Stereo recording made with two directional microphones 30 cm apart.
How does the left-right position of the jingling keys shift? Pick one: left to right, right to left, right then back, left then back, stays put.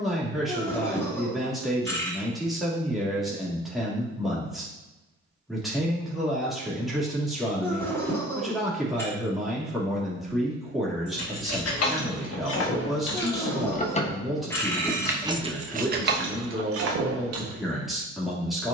left to right.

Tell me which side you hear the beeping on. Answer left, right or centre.
centre.